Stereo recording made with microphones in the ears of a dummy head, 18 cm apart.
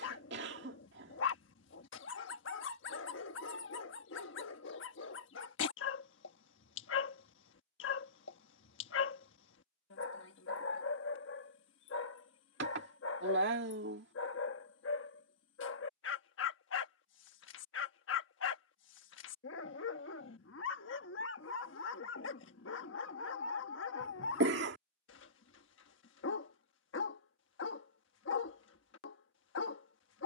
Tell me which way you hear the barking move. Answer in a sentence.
You can hear the barking stay in one place.